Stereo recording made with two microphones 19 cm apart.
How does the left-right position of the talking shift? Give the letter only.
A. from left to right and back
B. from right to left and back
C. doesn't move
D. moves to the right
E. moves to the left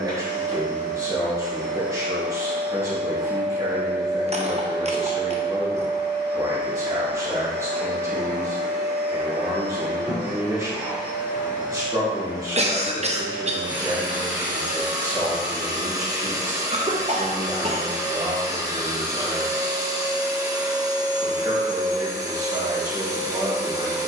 C.